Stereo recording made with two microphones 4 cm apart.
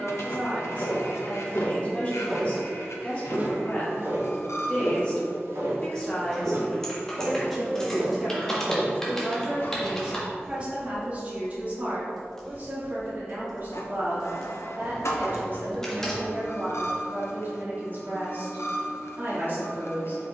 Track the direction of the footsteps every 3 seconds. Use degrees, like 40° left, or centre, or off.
20° left, 50° right, 30° right, 50° left, off, off, off.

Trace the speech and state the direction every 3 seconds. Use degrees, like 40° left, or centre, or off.
30° left, 30° left, 10° left, 20° right, 40° right, 40° right, 40° right.